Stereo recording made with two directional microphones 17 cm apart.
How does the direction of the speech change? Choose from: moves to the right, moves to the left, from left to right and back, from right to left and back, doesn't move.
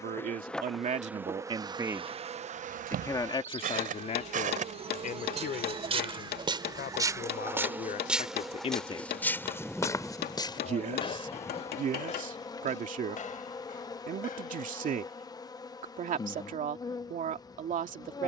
from right to left and back.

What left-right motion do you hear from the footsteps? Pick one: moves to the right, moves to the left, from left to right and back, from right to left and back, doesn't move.
moves to the left.